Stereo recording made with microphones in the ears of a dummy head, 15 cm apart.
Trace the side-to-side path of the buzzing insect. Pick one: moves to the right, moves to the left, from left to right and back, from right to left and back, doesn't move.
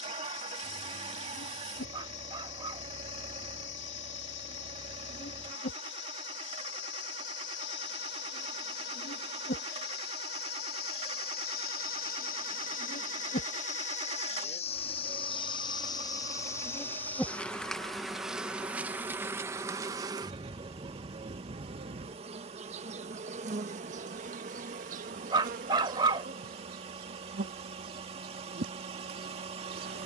moves to the right.